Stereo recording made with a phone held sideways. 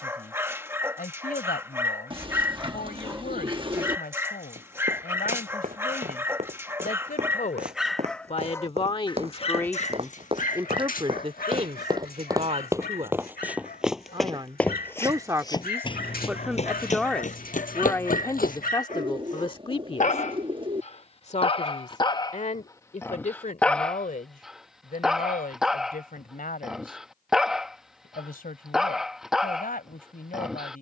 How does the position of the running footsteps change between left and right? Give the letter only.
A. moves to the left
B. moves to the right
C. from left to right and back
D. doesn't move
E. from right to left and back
A.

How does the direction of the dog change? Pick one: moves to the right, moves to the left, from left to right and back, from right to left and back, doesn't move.
from right to left and back.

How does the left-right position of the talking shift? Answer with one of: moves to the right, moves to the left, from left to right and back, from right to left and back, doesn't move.
from left to right and back.